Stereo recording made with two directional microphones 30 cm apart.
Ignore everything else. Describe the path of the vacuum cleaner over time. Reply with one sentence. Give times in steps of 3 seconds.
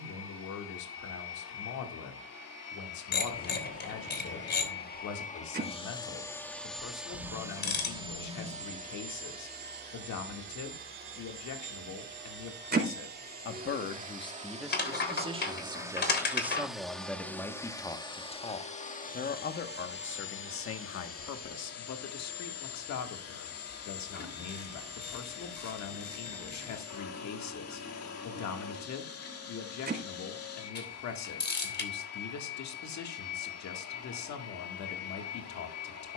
In this clip you hear the vacuum cleaner on the left from 0 s, in the centre from 6 s, on the right from 9 s, in the centre from 15 s and on the left from 18 s.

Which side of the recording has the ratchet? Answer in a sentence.
You can hear the ratchet on the left.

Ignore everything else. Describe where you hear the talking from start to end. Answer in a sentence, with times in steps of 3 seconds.
In this clip you hear the talking on the left from 0 s, in the centre from 15 s and on the left from 18 s.